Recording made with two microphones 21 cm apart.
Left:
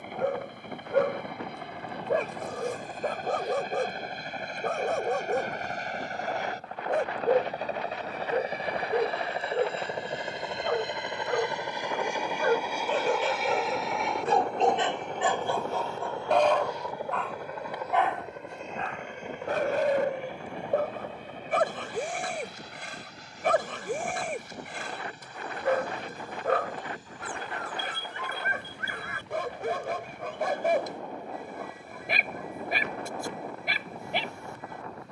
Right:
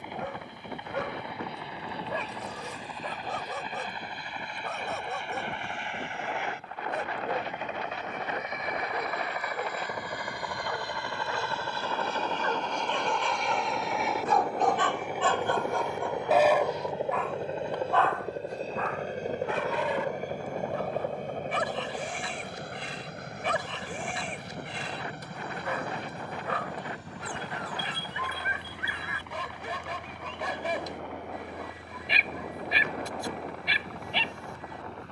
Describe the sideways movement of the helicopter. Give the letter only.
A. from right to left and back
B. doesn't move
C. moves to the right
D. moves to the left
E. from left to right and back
C.